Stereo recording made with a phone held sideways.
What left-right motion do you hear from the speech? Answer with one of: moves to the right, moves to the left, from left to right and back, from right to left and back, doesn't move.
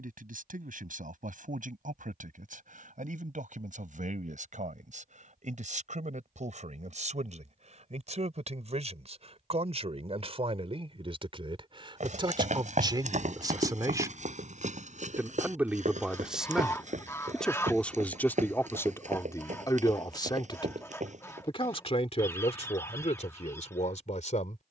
moves to the left.